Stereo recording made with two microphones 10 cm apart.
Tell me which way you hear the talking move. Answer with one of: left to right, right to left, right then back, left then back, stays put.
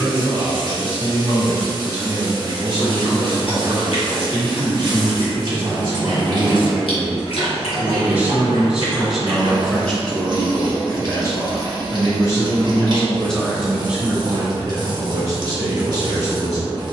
left then back.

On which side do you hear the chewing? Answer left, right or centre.
left.